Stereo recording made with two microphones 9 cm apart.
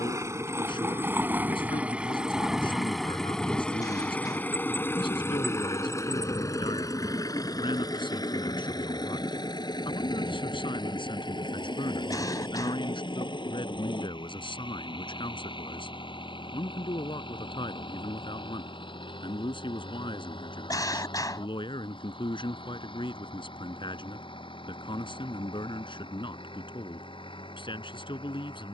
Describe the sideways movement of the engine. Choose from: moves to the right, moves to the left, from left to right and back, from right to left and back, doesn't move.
moves to the left.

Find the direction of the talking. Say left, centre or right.
left.